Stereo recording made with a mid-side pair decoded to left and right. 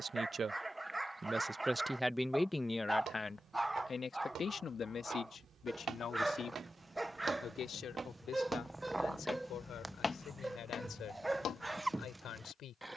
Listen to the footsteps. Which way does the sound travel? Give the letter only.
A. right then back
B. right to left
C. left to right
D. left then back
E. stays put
B.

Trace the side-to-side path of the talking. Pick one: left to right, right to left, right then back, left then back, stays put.
right to left.